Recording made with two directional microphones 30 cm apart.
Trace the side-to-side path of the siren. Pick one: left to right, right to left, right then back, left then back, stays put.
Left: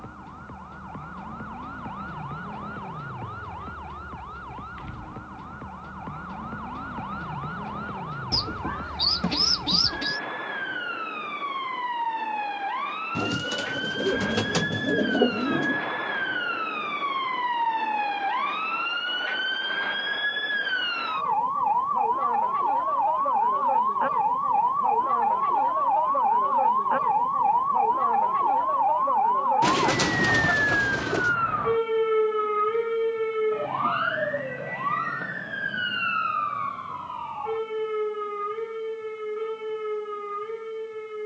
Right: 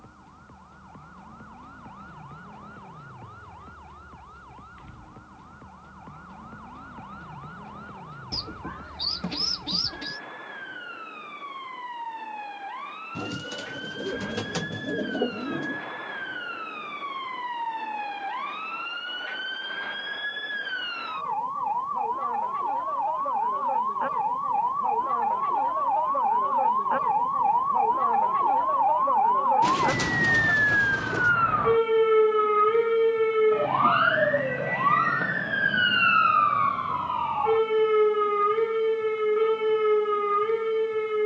left to right.